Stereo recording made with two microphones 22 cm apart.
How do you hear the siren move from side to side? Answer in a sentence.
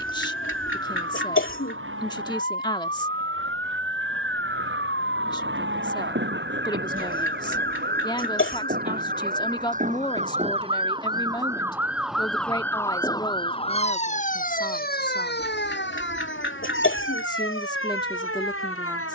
In this clip you hear the siren move from right to left.